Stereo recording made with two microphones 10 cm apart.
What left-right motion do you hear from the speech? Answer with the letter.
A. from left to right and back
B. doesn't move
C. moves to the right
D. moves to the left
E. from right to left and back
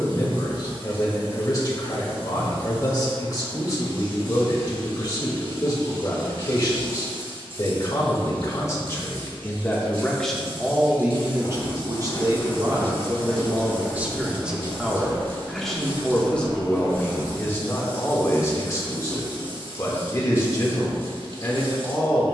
A.